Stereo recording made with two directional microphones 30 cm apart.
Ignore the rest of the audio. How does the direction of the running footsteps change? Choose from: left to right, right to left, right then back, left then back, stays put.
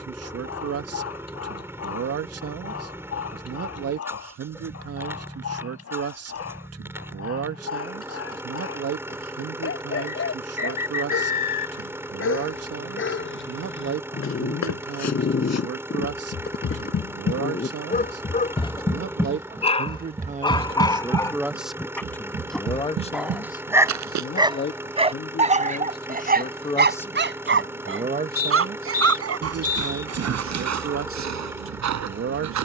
left to right.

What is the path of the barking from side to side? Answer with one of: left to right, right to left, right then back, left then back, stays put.
left to right.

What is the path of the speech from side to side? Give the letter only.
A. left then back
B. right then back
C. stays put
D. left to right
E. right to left
A.